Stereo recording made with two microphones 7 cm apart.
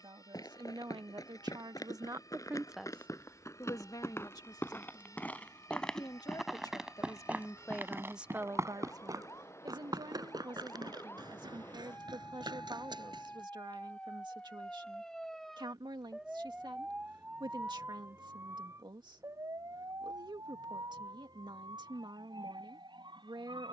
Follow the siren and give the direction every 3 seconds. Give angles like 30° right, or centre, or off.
50° left, 50° left, 40° left, 30° left, 20° left, 10° right, 50° right, 70° right.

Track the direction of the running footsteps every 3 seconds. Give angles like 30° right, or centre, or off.
50° left, 30° left, 20° right, 60° right, 70° right, off, off, off.